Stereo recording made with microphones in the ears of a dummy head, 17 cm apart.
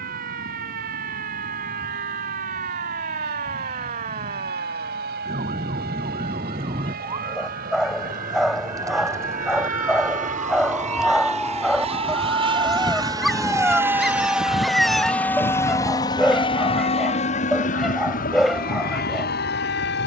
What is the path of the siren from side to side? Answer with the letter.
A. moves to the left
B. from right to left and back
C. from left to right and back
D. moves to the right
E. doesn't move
A.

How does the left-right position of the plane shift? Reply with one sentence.
You can hear the plane travel towards the left.